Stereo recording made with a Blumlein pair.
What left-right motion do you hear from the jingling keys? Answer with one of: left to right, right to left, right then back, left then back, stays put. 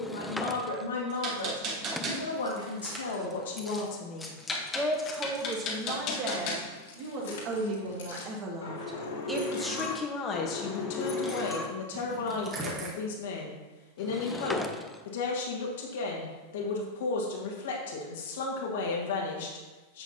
left then back.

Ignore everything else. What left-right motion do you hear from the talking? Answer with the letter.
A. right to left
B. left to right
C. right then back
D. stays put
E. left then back
C.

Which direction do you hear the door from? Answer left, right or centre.
centre.